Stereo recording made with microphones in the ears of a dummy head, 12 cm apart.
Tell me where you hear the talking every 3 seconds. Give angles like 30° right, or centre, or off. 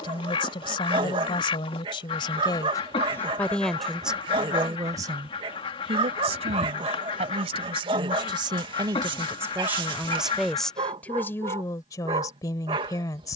40° left, 10° right, 40° right, centre, 30° left.